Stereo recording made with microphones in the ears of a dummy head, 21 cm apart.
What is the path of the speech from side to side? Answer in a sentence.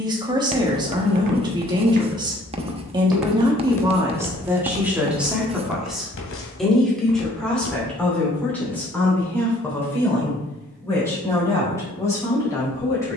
You can hear the speech move from right to left.